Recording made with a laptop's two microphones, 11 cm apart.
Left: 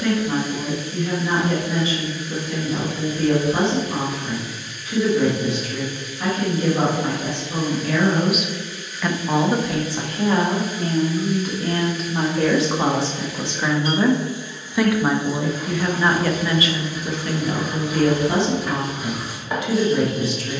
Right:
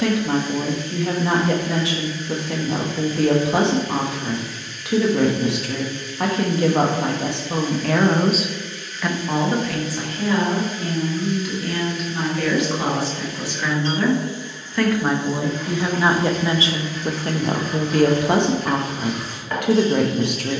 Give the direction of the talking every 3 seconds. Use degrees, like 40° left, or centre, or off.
70° right, 70° right, 60° right, 30° left, 20° left, 20° right, 60° right.